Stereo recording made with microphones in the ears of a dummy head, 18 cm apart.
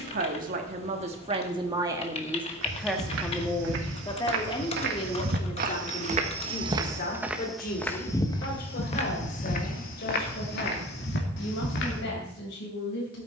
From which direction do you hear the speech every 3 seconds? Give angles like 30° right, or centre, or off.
30° right, 20° left, 50° left, 60° left, 60° left.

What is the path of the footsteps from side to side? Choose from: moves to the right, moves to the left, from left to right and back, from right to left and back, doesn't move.
moves to the left.